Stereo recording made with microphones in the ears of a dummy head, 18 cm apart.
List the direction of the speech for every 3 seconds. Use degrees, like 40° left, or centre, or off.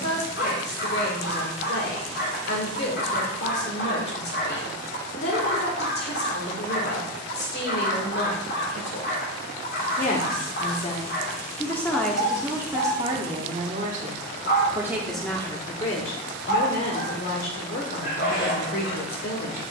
50° left, 50° left, 50° left, 30° left, 20° right, 40° left, 50° left.